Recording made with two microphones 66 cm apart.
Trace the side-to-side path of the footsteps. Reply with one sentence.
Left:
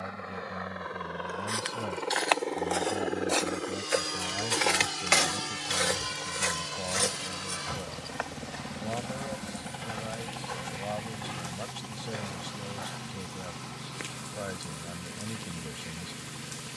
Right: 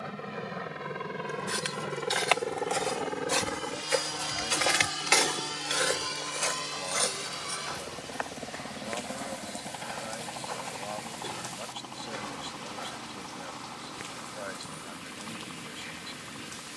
In this clip you hear the footsteps move from right to left and back again.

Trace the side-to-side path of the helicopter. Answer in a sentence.
In this clip you hear the helicopter go from the right side to the left.